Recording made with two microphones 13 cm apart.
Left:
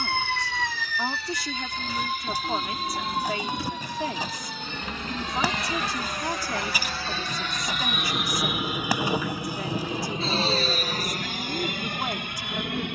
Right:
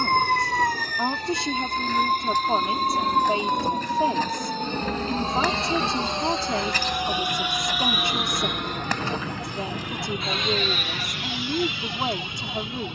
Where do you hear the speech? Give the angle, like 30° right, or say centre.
30° right.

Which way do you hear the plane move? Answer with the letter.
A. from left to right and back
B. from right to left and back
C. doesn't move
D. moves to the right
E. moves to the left
E.